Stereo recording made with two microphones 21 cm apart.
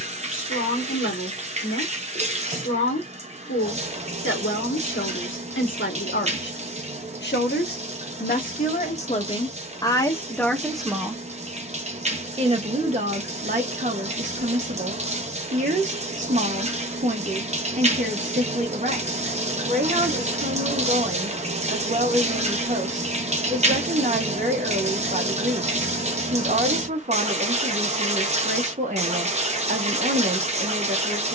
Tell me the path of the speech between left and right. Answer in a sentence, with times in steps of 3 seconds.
In this clip you hear the speech on the left from 0 s, in the centre from 9 s and on the right from 12 s.